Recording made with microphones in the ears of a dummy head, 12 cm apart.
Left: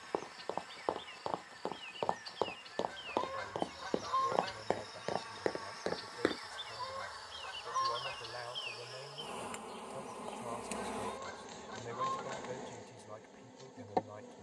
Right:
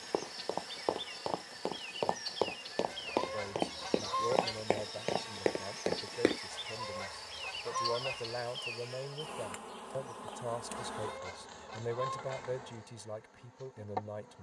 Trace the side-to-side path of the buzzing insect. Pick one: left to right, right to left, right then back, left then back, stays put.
right to left.